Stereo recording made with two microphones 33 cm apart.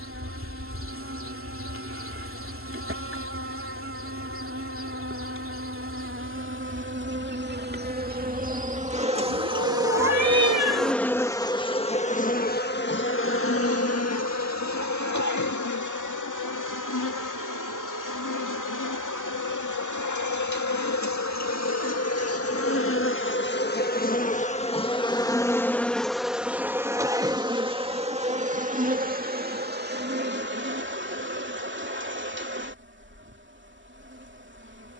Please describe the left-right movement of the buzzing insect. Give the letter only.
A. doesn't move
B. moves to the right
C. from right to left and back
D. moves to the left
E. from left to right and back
C.